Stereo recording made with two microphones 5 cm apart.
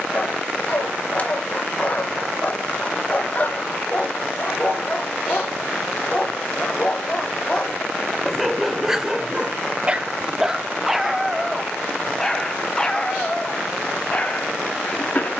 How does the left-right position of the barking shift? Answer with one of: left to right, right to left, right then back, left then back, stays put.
right then back.